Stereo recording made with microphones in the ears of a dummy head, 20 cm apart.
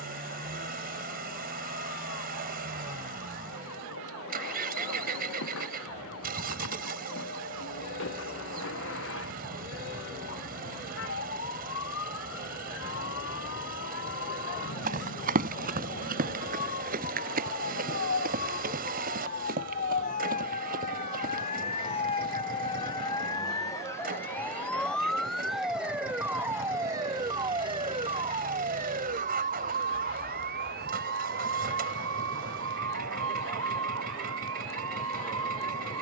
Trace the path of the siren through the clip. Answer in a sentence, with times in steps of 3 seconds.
You can hear the siren on the left from 0 s, in the centre from 24 s and on the right from 27 s.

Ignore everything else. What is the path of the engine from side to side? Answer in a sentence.
You can hear the engine stay in one place.